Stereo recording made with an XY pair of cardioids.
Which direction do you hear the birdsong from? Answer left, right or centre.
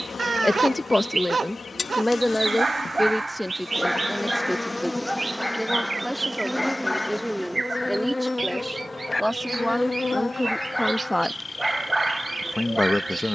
right.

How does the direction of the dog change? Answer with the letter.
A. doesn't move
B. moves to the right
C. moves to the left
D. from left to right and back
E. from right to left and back
E.